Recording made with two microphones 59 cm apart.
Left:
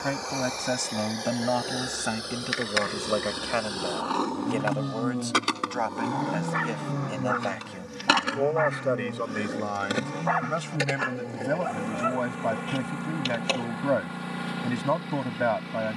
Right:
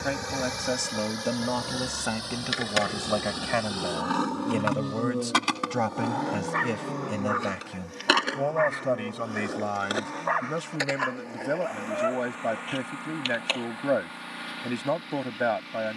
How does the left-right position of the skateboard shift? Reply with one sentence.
You can hear the skateboard travel towards the left.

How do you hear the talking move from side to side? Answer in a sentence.
In this clip you hear the talking move from left to right and back again.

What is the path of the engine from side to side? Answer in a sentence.
You can hear the engine travel towards the left.